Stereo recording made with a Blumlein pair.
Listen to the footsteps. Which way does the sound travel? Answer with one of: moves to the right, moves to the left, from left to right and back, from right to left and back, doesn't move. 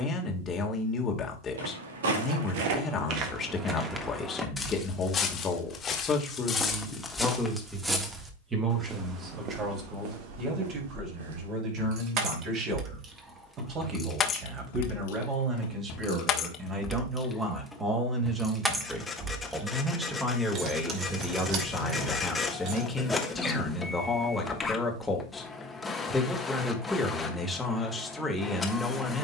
from right to left and back.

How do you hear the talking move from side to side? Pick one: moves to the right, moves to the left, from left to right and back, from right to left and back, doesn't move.
from left to right and back.